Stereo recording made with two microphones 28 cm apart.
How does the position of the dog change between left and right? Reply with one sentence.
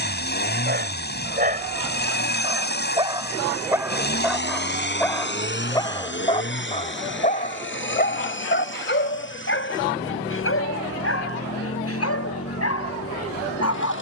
In this clip you hear the dog travel towards the left.